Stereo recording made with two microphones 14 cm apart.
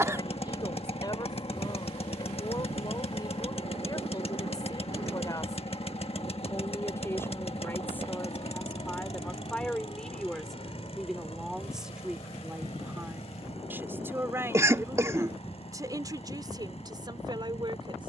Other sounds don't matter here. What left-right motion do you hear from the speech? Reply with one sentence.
In this clip you hear the speech go from the left side to the right.